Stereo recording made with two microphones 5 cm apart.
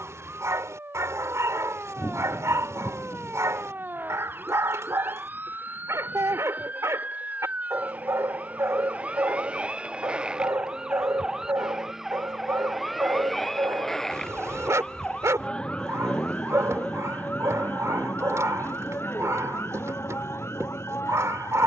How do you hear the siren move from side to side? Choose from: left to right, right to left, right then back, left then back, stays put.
right to left.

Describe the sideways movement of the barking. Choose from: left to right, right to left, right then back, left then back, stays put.
stays put.